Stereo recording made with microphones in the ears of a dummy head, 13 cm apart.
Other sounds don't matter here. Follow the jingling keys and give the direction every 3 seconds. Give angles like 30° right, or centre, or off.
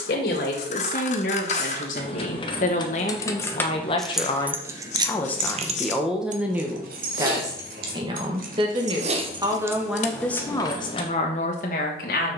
40° left, 10° right, 70° right, centre.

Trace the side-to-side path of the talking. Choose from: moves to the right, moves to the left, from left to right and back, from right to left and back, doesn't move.
from left to right and back.